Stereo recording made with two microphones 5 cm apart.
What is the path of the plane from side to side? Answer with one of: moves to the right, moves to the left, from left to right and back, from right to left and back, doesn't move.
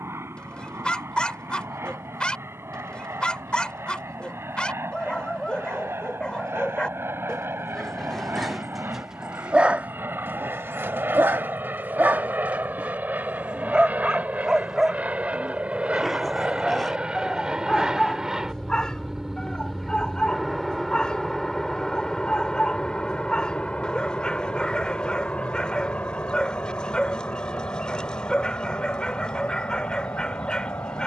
moves to the left.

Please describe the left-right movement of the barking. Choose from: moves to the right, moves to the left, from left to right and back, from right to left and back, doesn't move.
from left to right and back.